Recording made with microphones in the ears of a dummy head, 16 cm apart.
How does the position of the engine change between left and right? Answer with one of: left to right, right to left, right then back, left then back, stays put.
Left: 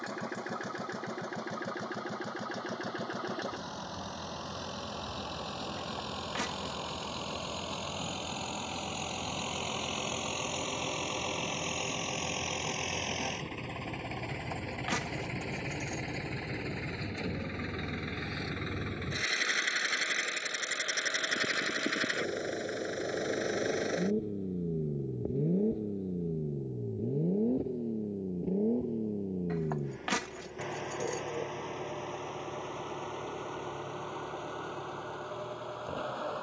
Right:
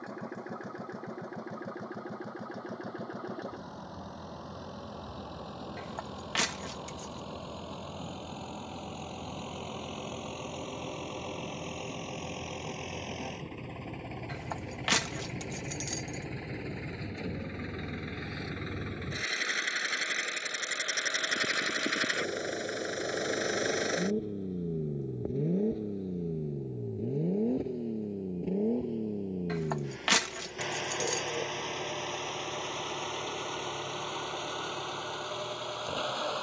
left to right.